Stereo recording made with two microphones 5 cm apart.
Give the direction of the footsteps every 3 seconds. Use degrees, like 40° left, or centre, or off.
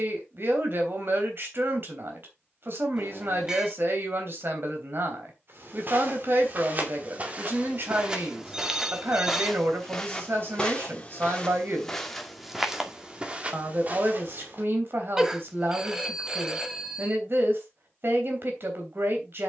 off, 50° right, 30° right, 10° left, 20° right, off, off.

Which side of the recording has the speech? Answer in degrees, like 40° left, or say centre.
50° right.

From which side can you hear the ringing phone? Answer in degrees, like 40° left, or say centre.
10° right.